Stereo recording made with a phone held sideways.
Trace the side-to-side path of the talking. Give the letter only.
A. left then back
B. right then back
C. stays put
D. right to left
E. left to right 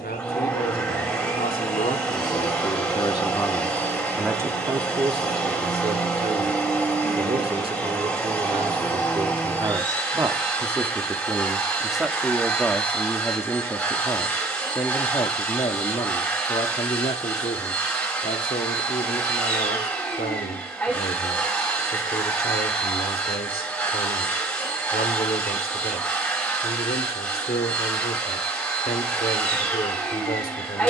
B.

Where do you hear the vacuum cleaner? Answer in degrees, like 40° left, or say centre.
10° left.